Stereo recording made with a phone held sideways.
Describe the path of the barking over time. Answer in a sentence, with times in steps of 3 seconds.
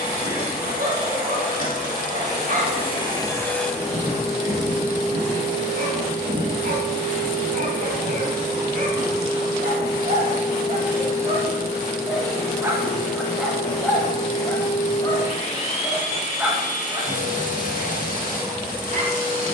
In this clip you hear the barking on the right from 0 s, in the centre from 12 s and on the right from 15 s.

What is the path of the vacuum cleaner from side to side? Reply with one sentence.
You can hear the vacuum cleaner go right and come back.